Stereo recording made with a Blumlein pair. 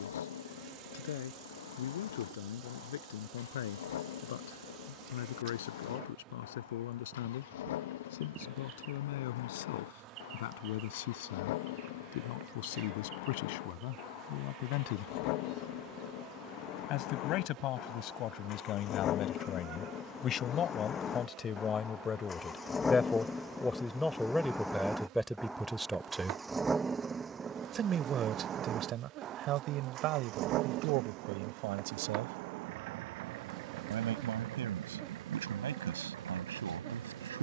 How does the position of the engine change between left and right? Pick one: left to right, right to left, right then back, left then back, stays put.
left to right.